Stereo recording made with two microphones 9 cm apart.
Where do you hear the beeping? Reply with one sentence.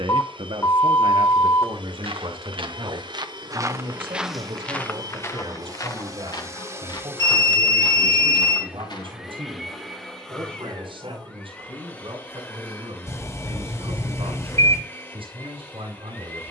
You can hear the beeping on the left.